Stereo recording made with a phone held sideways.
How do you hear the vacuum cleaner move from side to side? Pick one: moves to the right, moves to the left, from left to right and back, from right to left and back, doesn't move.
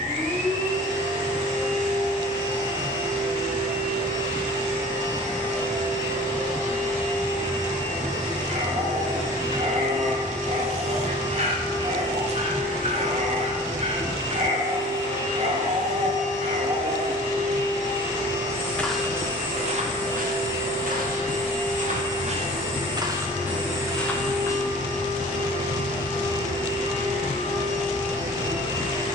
doesn't move.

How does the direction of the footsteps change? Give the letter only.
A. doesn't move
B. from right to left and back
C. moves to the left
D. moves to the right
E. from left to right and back
E.